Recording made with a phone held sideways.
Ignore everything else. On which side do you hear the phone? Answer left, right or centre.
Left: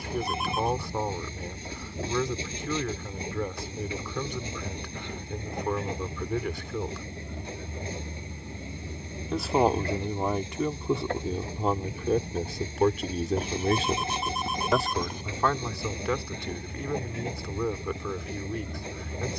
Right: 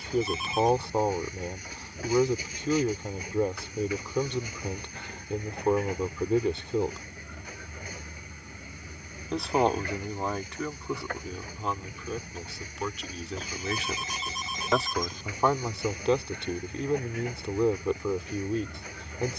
left.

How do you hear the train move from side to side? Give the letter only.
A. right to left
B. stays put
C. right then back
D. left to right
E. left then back
B.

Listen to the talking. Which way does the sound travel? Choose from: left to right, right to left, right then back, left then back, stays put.
left then back.